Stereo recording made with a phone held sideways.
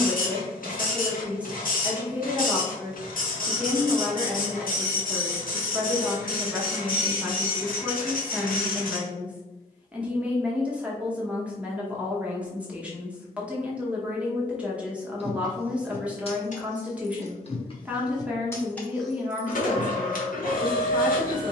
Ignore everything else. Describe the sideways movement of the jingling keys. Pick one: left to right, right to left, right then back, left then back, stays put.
left then back.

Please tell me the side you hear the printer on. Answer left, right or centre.
left.